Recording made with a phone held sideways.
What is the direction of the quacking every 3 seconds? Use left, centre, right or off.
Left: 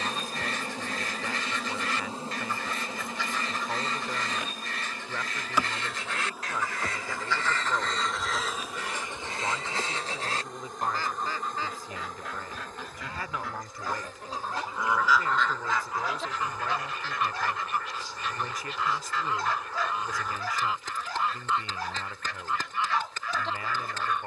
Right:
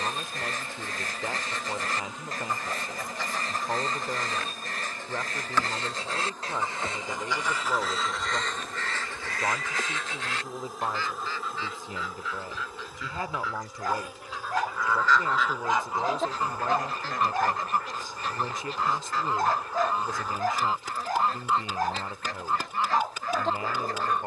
right, right, centre, left, left, right, right, right.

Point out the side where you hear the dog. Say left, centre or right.
right.